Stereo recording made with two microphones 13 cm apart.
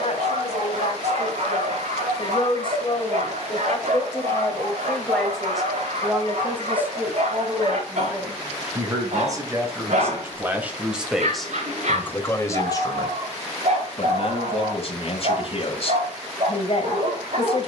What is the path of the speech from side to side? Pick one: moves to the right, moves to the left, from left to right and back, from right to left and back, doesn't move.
from left to right and back.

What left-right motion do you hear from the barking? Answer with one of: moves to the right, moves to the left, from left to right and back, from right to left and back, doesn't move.
doesn't move.